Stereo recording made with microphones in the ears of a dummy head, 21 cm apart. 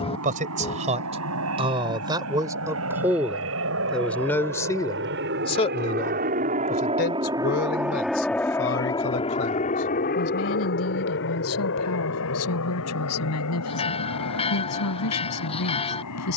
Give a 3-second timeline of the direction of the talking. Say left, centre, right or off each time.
right, centre, left, left, left, left.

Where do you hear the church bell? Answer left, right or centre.
left.